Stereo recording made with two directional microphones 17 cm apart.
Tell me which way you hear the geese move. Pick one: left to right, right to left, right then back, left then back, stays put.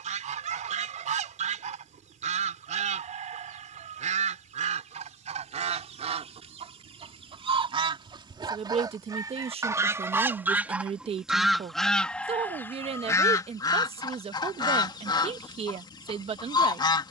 right to left.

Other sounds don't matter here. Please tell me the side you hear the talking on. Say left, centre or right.
right.